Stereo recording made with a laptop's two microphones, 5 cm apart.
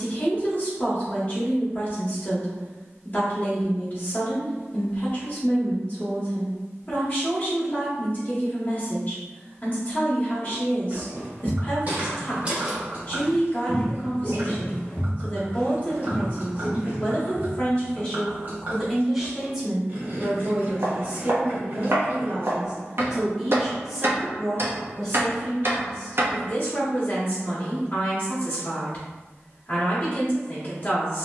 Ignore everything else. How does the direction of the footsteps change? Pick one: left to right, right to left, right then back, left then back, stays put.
left then back.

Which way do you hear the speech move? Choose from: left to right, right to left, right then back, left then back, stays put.
right then back.